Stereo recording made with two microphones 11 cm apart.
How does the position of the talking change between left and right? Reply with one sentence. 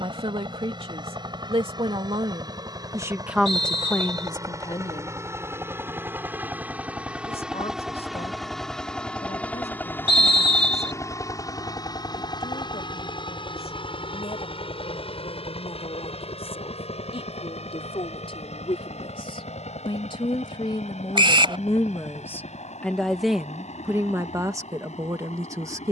In this clip you hear the talking move from right to left and back again.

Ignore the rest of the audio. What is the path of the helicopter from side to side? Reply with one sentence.
In this clip you hear the helicopter move to the left.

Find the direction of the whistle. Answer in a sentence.
You can hear the whistle on the right.